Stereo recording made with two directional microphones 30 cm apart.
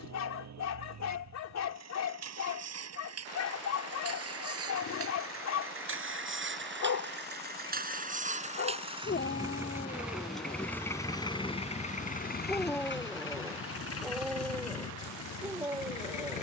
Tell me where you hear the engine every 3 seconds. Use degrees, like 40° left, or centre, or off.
50° right, 50° right, 30° right, centre, 40° left, 60° left.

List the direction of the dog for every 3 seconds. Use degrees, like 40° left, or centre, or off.
50° left, 50° left, 50° left, 30° left, centre, 10° right.